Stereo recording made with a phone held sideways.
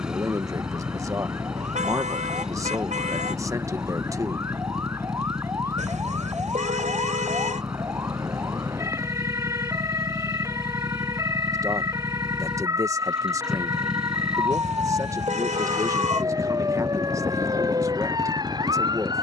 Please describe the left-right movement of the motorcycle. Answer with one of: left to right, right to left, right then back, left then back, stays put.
stays put.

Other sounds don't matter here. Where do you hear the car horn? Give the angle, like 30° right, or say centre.
60° right.